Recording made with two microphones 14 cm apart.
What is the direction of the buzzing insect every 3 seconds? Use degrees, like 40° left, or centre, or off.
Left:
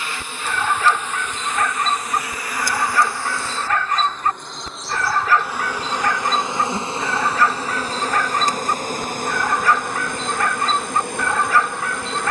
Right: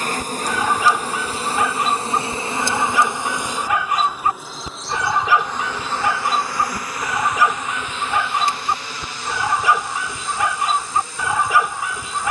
30° right, centre, 30° left, 60° left.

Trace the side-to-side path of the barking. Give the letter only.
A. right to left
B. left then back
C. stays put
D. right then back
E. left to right
C.